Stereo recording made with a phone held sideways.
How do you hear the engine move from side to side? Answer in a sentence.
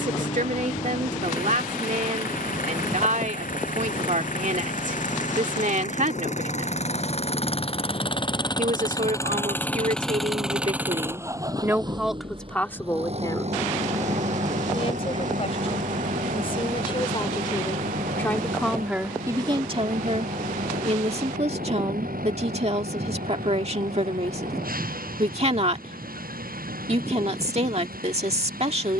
You can hear the engine move to the right.